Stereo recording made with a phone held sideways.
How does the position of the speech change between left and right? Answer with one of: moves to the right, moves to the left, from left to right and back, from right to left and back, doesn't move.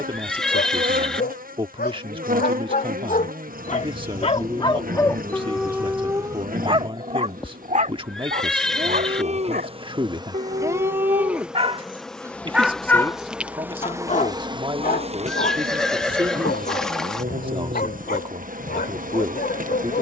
doesn't move.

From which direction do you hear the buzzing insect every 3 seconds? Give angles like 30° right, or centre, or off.
60° right, 60° right, 60° right, 20° right, 10° right, 50° right, 60° right.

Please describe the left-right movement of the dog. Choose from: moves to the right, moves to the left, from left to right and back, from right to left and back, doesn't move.
from left to right and back.